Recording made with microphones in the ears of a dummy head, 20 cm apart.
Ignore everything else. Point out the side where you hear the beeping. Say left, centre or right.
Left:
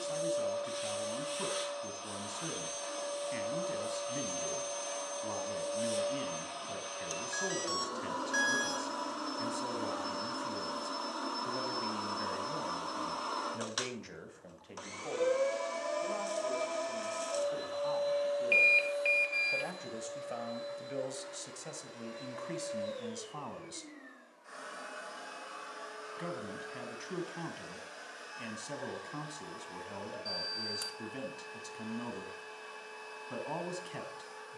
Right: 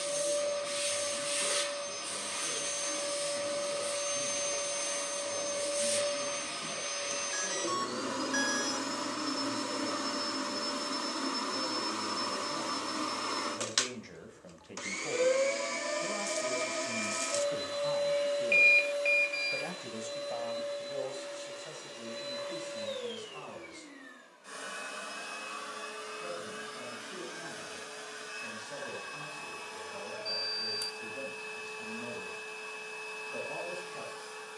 centre.